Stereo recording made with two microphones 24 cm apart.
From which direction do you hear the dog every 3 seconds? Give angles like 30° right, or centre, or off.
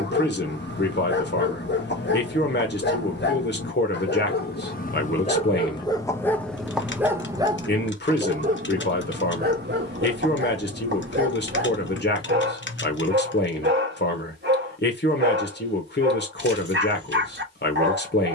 40° left, 30° left, 10° right, 40° right, 40° right, 40° right.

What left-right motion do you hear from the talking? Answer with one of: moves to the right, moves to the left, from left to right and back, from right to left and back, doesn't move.
doesn't move.